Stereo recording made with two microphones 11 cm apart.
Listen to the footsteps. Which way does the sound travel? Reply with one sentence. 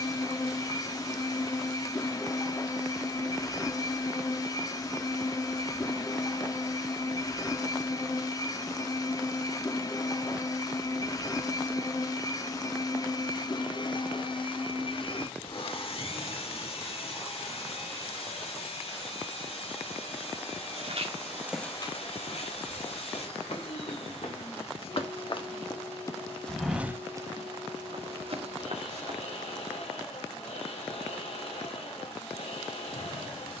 You can hear the footsteps go left and come back.